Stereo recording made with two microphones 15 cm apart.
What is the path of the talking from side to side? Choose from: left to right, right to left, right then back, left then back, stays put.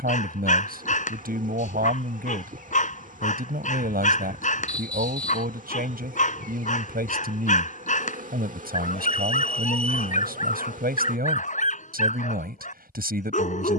stays put.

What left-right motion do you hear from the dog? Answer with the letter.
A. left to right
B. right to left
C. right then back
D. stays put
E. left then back
D.